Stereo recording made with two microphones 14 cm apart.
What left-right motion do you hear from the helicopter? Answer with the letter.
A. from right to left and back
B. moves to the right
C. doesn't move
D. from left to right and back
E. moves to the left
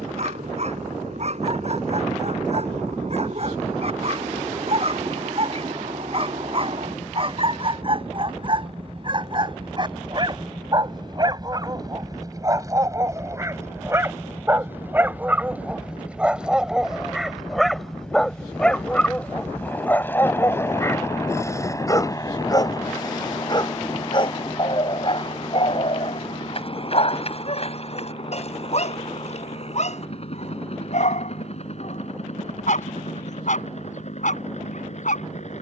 E.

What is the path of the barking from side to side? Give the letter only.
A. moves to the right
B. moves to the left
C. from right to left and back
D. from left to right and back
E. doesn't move
B.